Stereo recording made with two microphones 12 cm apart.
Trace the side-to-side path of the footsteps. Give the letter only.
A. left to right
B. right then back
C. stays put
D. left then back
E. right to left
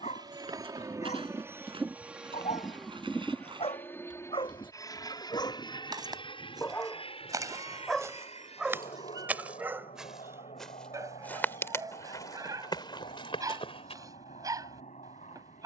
E.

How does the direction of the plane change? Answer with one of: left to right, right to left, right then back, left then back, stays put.
right to left.